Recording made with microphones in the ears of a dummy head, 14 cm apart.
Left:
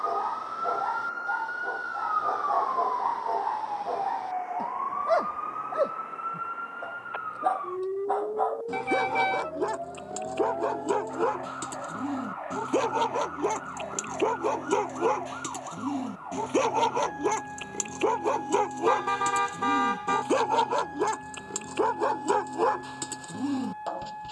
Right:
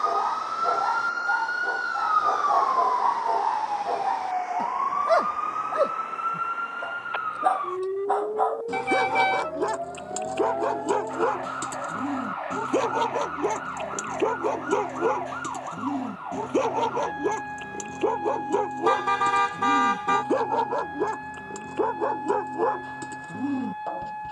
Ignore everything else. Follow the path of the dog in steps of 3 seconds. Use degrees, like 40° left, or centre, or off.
20° right, 20° right, 20° right, 10° right, 10° left, 30° left, 50° left, 60° left.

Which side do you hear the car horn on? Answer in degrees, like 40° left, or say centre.
10° right.